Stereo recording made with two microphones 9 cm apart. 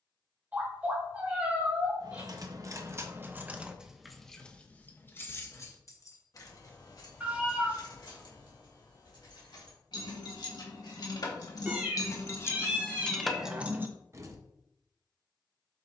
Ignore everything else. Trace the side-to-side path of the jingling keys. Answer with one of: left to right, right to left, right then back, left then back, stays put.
left then back.